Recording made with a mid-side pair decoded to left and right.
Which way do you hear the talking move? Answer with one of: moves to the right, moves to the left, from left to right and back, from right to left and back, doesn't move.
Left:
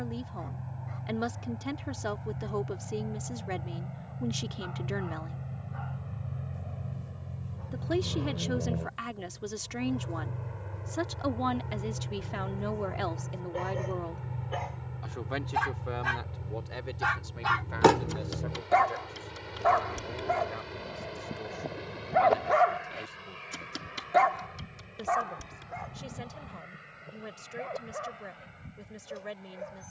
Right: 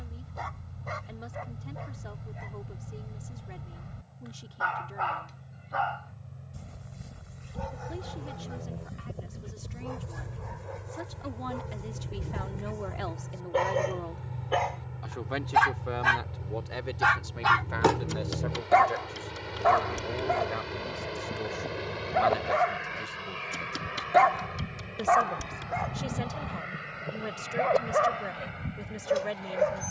moves to the right.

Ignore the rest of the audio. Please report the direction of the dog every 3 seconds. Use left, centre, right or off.
right, right, right, right, right, right, centre, centre, right, right.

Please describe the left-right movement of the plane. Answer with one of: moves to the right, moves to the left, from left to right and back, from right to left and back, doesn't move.
moves to the right.